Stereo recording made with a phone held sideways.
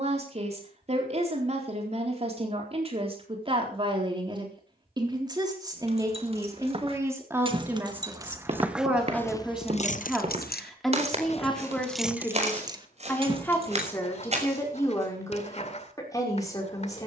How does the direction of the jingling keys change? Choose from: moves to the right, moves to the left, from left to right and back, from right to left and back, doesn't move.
from right to left and back.